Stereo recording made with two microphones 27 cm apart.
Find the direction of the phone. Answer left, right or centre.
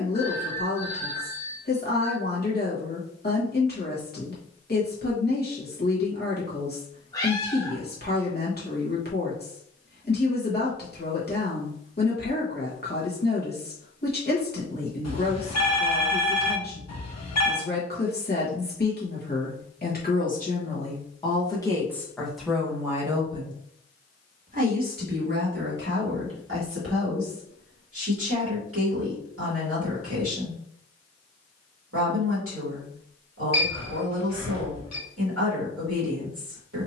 left.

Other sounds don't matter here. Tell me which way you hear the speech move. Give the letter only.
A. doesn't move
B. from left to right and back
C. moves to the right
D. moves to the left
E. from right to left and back
C.